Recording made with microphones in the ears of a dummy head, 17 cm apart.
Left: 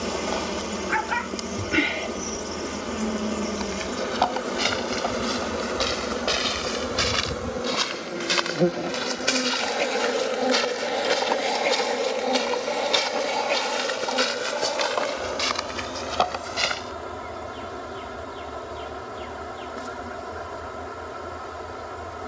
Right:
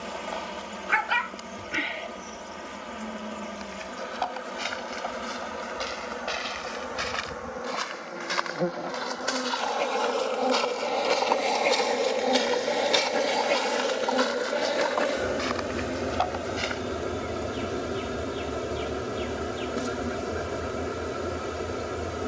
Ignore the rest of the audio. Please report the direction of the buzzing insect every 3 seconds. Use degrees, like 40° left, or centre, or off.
60° left, 60° left, 40° left, 20° left, 10° right, 30° right, 40° right, 40° right.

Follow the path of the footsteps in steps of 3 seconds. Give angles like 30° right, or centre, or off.
off, 60° left, 50° left, 20° left, 20° left, 50° left, off, off.